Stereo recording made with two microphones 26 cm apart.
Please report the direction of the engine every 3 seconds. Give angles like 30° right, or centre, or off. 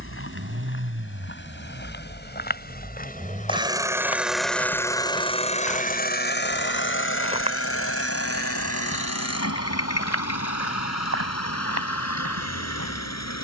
40° right, centre, 60° left, 80° left, 80° left.